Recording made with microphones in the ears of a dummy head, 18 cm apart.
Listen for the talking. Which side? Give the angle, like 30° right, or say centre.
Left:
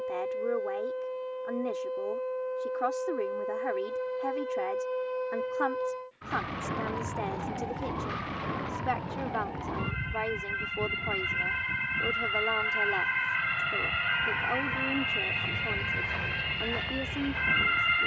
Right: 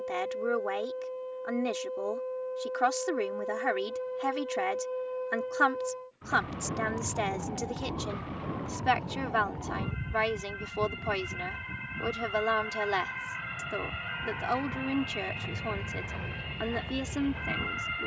70° right.